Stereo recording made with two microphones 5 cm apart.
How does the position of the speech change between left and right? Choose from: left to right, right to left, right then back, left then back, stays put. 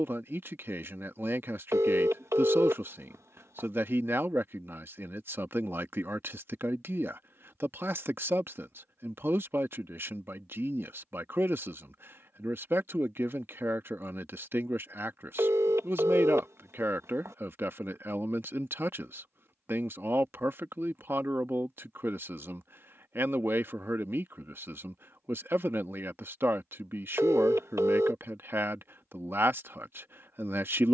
stays put.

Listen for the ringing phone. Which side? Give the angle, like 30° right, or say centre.
70° right.